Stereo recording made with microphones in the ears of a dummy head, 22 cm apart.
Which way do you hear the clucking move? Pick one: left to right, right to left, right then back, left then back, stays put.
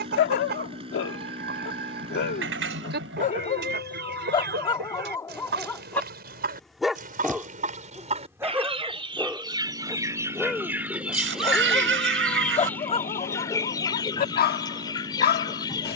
right to left.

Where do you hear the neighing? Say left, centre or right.
right.